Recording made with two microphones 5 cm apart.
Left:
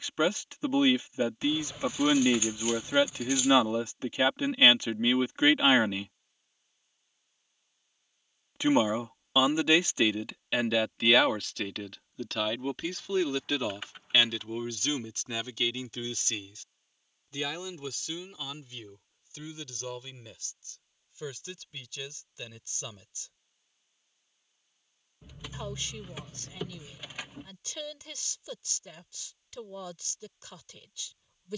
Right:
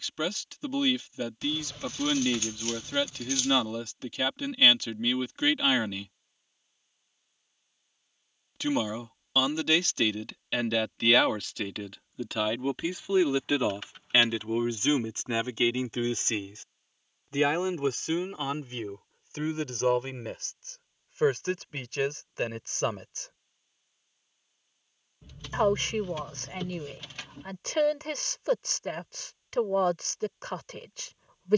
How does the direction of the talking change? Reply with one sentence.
You can hear the talking go from the left side to the right.